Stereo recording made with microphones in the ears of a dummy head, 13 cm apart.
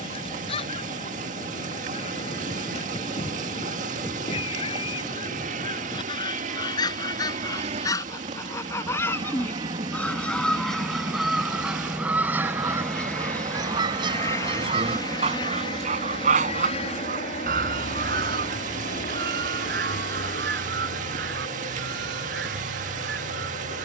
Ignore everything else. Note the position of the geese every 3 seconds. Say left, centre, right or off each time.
left, left, left, centre, right, right, right, right.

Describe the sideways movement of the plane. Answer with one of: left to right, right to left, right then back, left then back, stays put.
right to left.